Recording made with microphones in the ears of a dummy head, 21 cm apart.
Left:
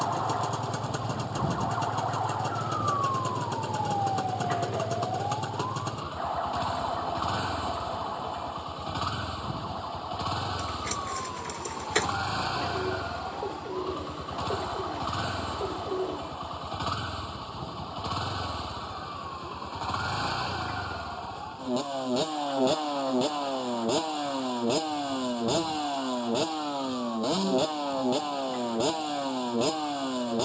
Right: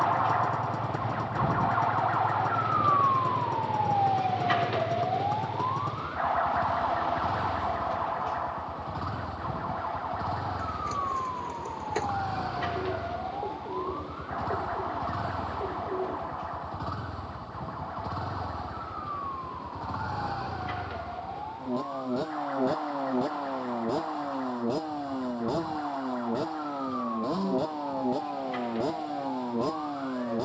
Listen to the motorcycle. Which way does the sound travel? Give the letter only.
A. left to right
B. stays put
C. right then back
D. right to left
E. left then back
B.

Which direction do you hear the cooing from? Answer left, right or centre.
left.